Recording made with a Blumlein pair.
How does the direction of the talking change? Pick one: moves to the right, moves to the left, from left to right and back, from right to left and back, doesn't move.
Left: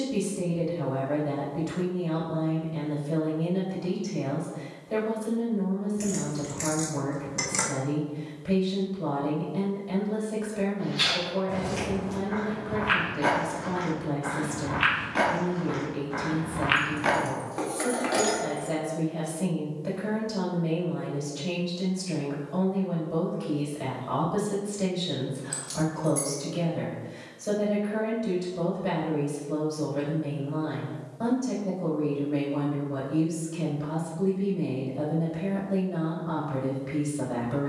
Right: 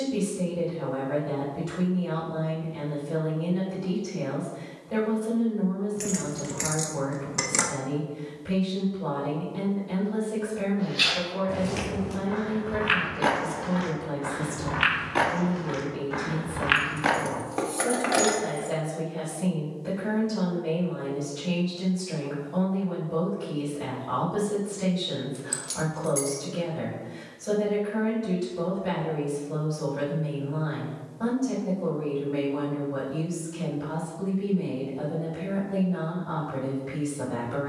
doesn't move.